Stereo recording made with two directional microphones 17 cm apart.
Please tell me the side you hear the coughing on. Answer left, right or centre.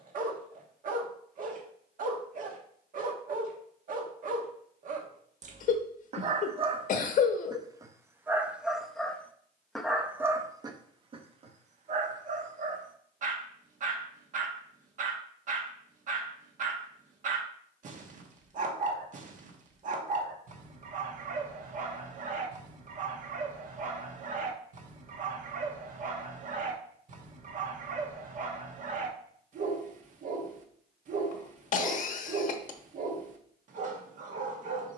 left.